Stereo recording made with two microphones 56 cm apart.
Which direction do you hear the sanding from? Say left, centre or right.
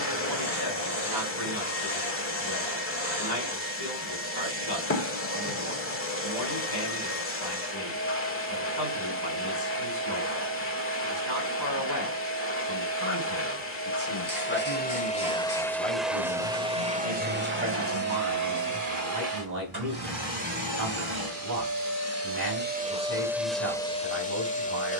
left.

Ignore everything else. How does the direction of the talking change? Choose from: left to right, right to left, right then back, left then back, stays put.
left to right.